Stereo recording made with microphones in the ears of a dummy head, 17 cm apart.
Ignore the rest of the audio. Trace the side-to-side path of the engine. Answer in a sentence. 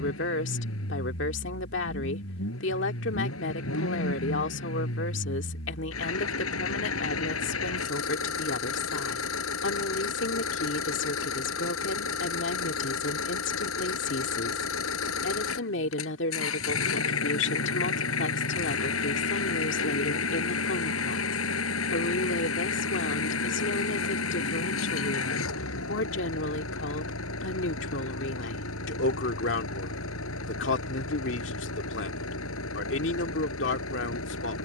In this clip you hear the engine stay put.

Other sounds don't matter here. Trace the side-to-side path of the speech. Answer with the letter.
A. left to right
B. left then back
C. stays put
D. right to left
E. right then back
C.